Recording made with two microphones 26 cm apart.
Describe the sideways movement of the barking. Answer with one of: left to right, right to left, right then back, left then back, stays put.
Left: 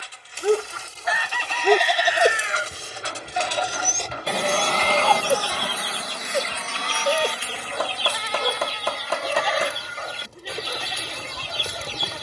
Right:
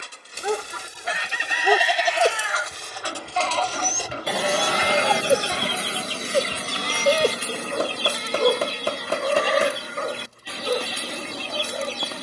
left to right.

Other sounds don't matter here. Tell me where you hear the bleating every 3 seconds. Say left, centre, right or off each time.
centre, left, left, left.